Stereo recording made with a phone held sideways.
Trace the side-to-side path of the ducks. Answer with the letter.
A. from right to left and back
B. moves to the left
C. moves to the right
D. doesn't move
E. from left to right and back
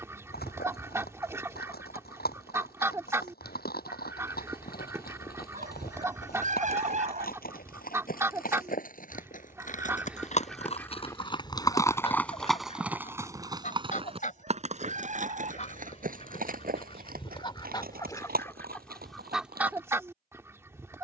A.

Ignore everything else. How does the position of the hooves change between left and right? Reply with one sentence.
You can hear the hooves go from the left side to the right.